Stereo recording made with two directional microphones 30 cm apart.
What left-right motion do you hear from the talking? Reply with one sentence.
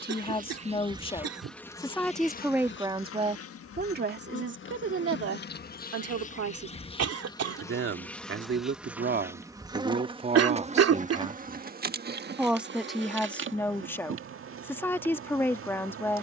You can hear the talking move from left to right and back again.